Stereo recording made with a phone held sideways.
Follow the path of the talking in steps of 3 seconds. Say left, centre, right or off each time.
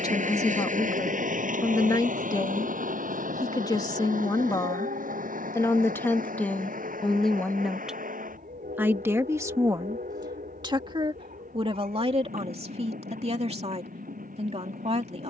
left, left, centre, right, right.